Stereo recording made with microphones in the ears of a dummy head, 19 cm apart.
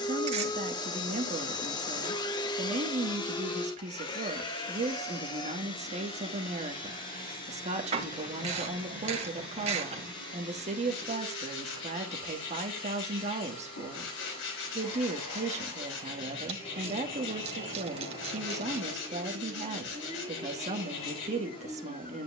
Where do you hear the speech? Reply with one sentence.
In this clip you hear the speech on the right.